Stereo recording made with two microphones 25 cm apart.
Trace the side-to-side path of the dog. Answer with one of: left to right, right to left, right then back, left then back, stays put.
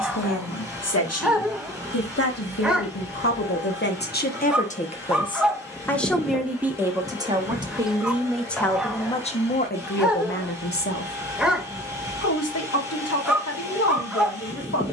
stays put.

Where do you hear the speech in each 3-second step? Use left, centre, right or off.
left, left, centre, left, left.